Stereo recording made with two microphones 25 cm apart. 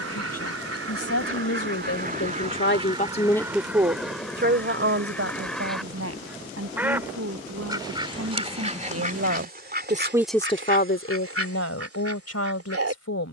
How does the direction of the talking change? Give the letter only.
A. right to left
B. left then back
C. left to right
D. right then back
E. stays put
D.